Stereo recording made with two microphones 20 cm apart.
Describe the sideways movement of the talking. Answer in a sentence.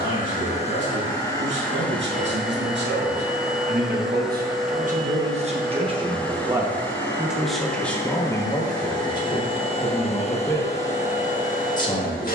You can hear the talking travel towards the left.